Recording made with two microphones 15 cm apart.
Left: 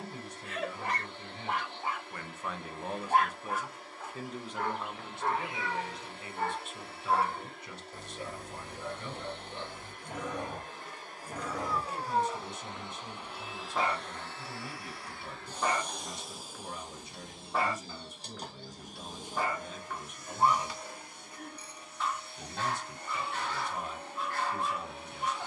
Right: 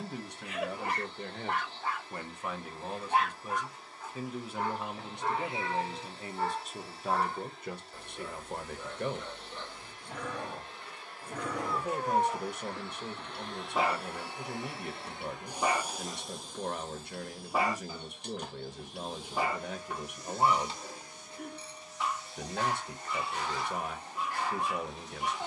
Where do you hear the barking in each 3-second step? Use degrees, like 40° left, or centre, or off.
centre, 60° left, 40° left, 20° left, 10° right, 10° right, 10° right, 10° right, 10° right.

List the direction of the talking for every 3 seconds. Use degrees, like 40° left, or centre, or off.
40° right, 10° right, 50° right, 60° right, 60° right, 60° right, 60° right, 60° right, 60° right.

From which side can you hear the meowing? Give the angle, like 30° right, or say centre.
30° right.